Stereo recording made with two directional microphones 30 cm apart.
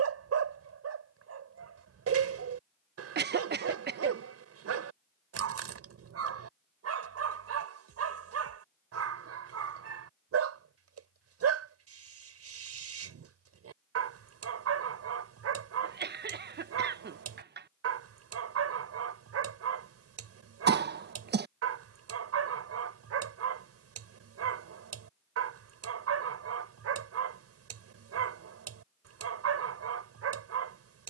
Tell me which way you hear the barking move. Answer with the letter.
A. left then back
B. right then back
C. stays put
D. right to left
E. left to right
C.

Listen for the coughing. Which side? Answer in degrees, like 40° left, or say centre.
30° right.